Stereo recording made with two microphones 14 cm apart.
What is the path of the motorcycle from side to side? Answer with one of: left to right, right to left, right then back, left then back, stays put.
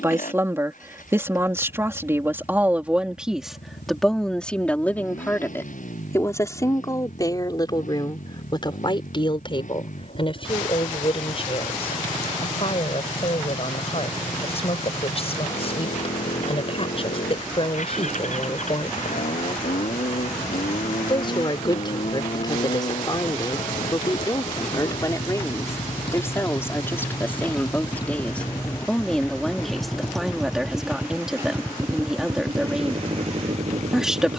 left to right.